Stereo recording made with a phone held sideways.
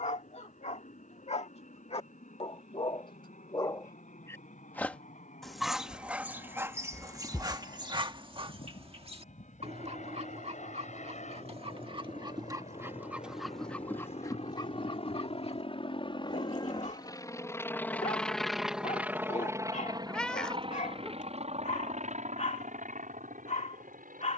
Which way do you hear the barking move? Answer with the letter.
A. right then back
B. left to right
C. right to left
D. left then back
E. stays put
A.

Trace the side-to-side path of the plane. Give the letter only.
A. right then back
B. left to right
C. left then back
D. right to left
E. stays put
B.